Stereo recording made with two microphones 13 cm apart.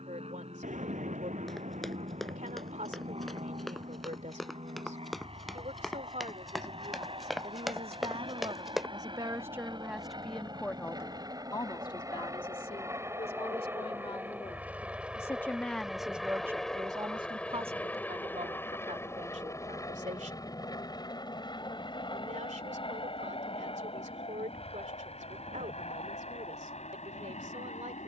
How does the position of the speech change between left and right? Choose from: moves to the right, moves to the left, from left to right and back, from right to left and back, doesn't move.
from right to left and back.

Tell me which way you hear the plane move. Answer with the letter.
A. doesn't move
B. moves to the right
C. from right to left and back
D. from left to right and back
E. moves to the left
E.